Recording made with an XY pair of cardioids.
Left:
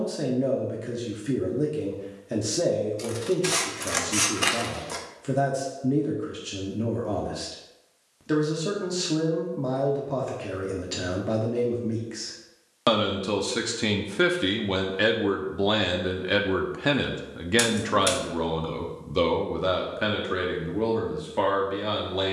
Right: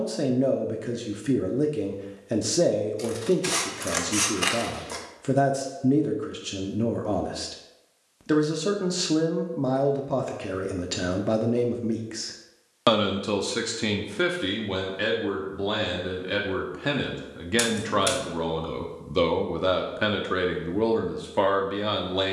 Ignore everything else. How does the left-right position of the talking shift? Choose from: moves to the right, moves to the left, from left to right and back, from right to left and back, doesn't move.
from right to left and back.